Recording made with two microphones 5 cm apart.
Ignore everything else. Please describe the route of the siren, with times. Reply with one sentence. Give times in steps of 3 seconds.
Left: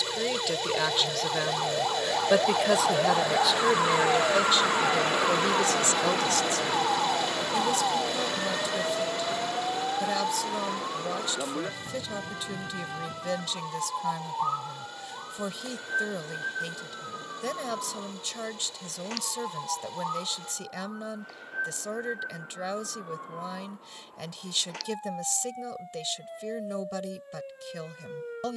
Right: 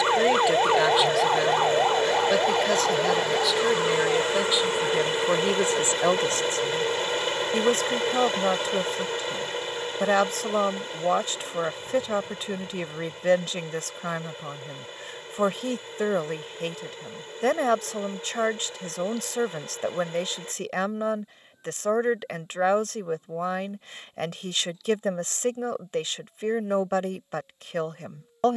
You can hear the siren on the right from 0 s and on the left from 3 s.